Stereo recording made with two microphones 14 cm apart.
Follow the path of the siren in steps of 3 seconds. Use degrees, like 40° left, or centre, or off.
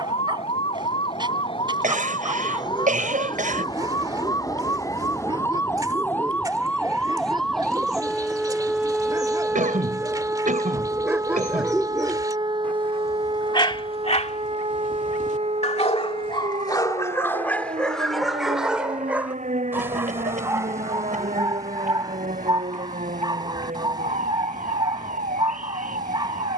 40° left, 30° left, centre, 20° right, 40° right, 50° right, 60° right, 60° right, 70° right.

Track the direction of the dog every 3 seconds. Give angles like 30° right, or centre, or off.
30° right, 30° right, 30° right, 20° right, 40° left, 30° left, 10° right, 30° right, 30° right.